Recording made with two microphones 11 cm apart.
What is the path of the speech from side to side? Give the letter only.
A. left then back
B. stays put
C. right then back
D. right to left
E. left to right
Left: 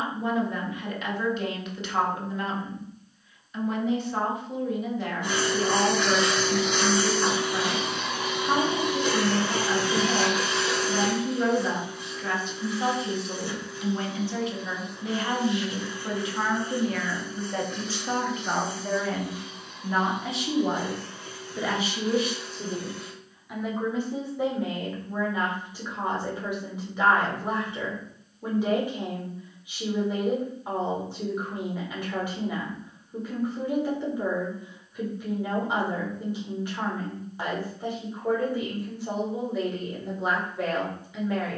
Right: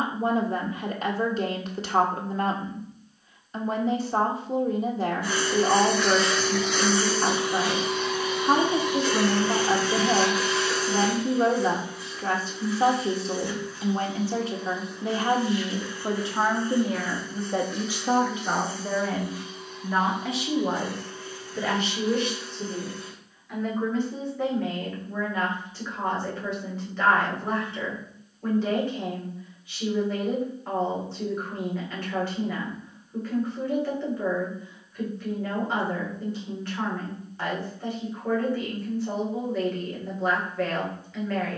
D.